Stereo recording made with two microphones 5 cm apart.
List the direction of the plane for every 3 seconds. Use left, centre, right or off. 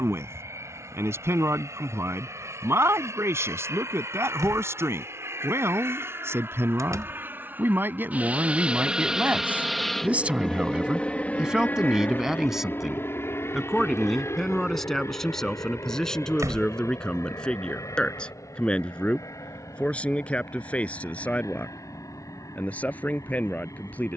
right, right, right, centre, left, left, left, left.